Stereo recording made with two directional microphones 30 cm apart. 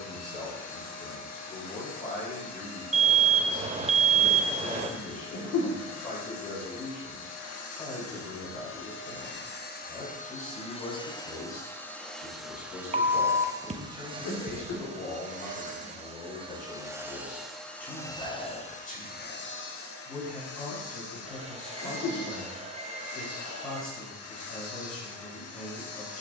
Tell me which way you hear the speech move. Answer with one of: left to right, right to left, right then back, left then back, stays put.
stays put.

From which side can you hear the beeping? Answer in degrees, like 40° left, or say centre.
20° right.